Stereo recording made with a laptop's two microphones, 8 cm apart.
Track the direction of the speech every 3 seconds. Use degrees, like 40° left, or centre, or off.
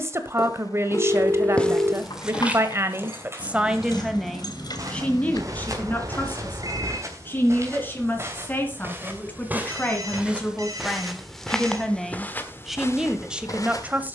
30° right, centre, 20° left, 10° left, 10° right.